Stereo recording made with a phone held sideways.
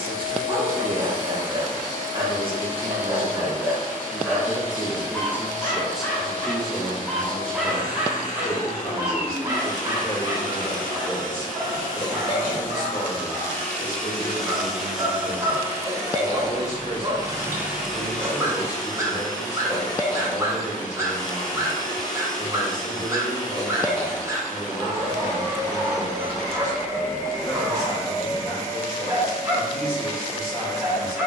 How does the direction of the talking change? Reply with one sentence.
In this clip you hear the talking travel towards the left.